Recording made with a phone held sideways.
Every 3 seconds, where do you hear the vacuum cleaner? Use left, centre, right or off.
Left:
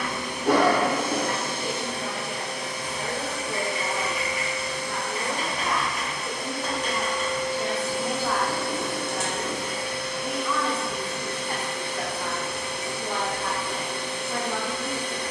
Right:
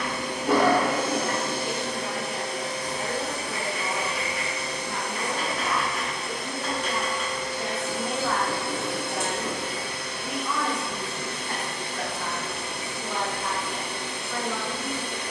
right, right, left, left, left.